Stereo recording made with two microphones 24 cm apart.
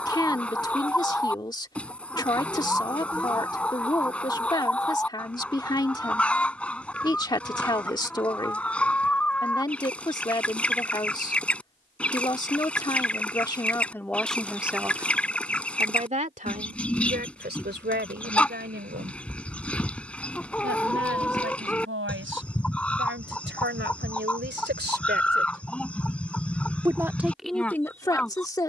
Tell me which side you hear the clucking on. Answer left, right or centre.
centre.